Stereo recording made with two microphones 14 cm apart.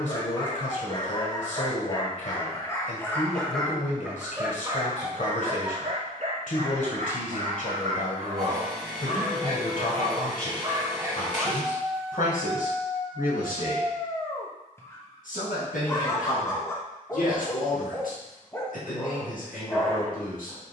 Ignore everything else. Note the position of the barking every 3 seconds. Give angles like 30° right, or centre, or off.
30° left, 20° right, 60° right, 30° right, 20° left, 20° left, 20° left.